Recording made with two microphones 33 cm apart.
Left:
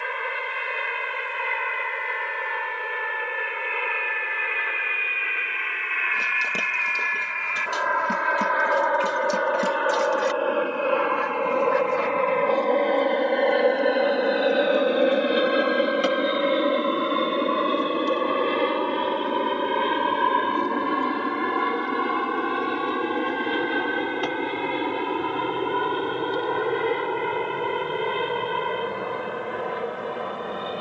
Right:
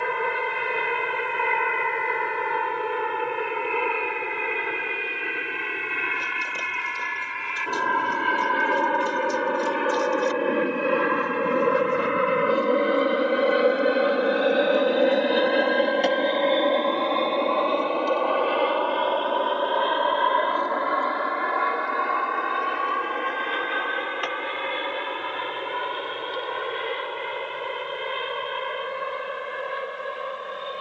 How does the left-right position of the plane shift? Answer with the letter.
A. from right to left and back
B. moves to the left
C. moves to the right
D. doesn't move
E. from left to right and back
B.